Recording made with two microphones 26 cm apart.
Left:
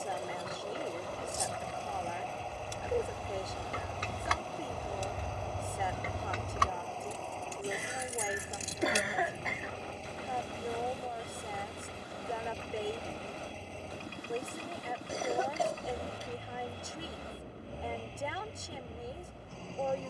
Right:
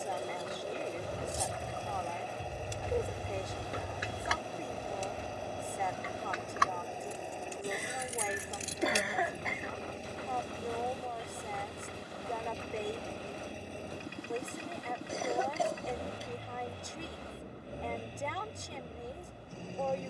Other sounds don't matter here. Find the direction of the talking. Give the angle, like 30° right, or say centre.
centre.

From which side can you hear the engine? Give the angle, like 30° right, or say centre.
20° right.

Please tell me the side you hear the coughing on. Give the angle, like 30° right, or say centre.
centre.